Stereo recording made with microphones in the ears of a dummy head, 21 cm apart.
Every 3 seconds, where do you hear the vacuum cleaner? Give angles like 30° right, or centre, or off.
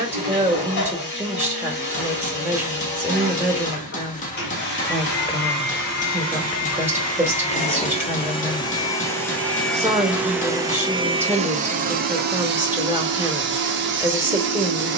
50° left, 50° left, 30° left, 10° right, 50° right.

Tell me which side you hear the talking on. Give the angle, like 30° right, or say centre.
10° right.